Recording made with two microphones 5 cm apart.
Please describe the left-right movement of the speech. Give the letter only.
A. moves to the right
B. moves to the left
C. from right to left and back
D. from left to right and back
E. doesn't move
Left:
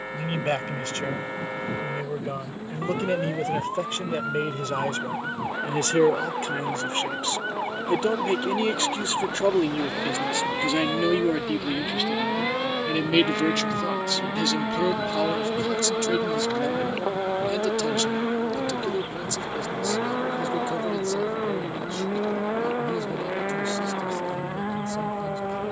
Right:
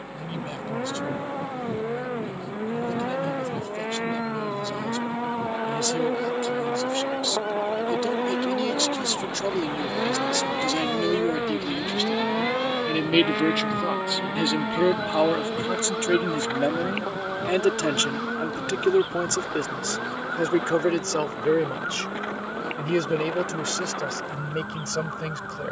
A.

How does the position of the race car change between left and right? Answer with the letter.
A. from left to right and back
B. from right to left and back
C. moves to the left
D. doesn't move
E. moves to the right
C.